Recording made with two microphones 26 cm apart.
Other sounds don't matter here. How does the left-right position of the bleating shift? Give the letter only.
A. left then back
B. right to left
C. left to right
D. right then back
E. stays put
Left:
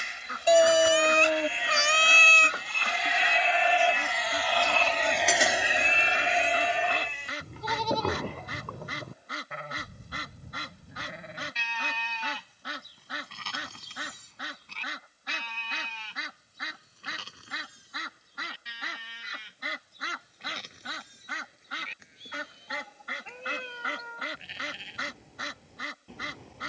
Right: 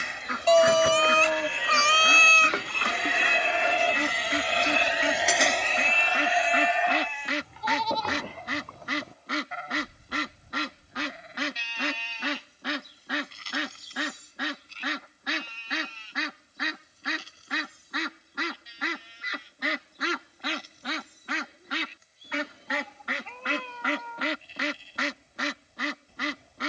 B.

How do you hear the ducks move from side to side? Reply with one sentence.
You can hear the ducks stay in one place.